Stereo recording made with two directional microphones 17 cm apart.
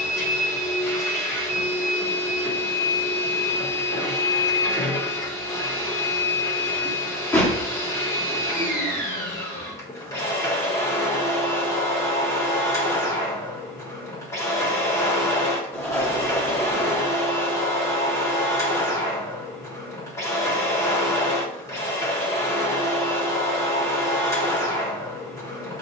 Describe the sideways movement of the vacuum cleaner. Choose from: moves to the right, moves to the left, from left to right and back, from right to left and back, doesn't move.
doesn't move.